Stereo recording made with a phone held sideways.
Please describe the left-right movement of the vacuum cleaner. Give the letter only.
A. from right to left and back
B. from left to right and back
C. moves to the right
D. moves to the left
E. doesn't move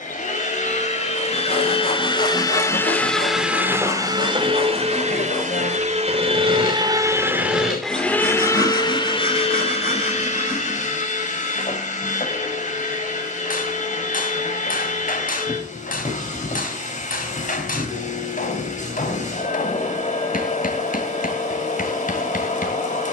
B.